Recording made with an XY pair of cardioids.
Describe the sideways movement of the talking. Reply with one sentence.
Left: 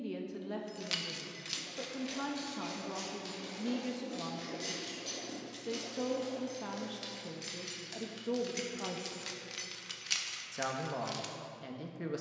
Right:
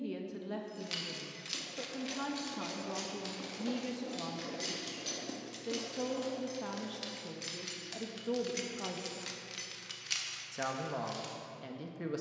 You can hear the talking stay put.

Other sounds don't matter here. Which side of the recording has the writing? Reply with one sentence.
In this clip you hear the writing on the right.